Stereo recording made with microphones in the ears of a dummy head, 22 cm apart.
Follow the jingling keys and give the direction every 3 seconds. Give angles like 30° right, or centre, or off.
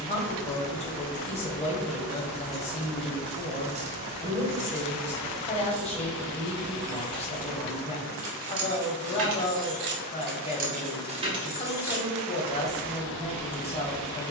10° left, 40° right, 70° right, 40° right, 20° left.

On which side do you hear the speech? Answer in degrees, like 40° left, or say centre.
30° left.